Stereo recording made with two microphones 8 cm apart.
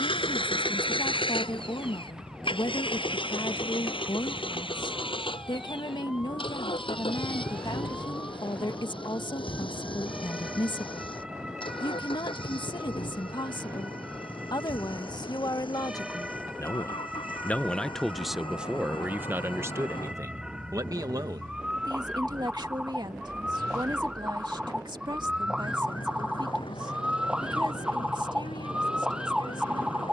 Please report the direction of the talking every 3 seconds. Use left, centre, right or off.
left, left, left, left, left, left, right, right, right, right.